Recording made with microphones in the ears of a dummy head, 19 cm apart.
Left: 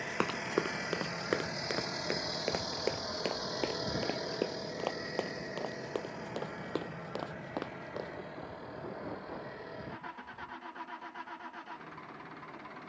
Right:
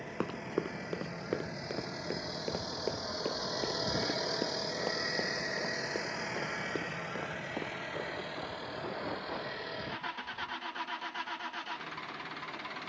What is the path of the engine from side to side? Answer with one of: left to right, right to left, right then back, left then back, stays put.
left to right.